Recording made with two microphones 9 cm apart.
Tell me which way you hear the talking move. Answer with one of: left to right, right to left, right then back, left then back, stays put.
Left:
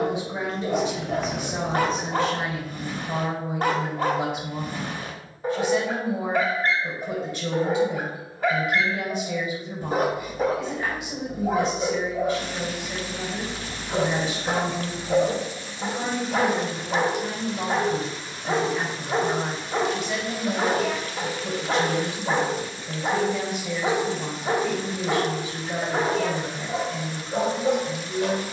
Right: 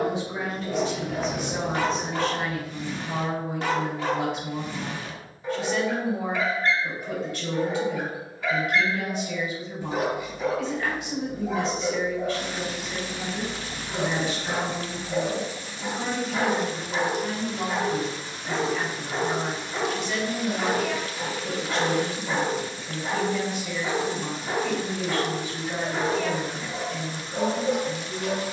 stays put.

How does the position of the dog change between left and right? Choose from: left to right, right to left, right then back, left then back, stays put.
stays put.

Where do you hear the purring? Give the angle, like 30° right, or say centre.
centre.